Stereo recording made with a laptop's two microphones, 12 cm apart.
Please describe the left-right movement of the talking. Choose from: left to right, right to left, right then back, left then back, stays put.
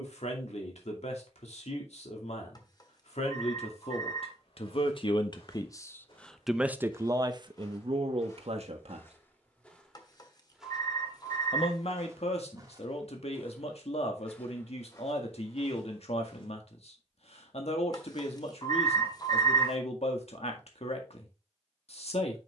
right then back.